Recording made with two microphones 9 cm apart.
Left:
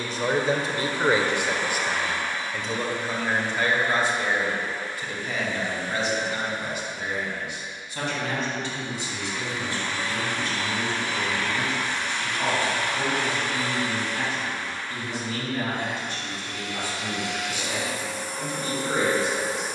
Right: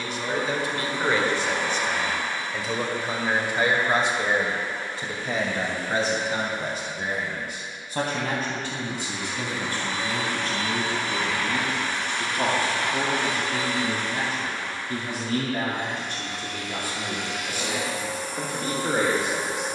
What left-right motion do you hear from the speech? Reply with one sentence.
You can hear the speech move from left to right.